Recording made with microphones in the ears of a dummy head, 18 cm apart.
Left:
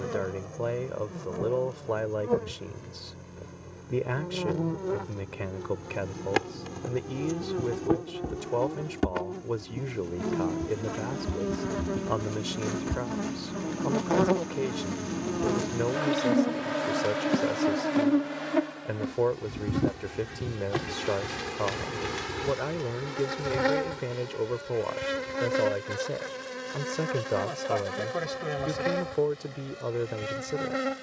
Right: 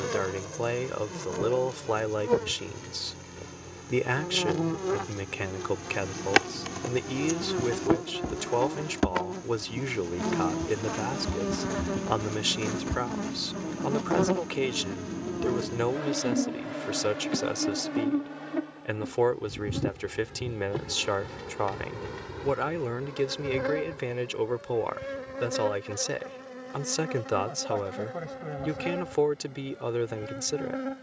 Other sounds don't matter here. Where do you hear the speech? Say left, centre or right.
right.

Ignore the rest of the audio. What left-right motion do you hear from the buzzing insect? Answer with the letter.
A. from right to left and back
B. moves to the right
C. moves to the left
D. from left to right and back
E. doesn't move
C.